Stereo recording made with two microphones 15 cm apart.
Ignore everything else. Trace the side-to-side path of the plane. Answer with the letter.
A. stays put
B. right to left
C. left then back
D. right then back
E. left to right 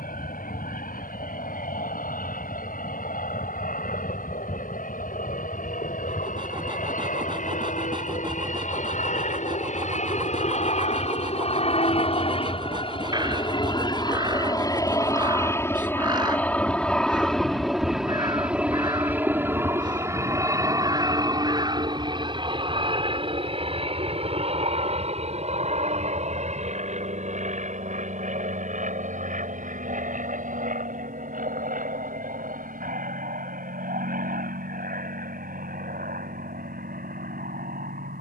E.